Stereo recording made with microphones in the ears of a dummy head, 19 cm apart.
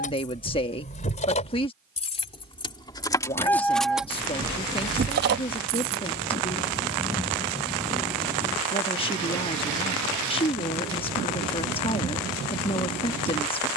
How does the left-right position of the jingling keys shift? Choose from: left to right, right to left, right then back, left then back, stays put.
left to right.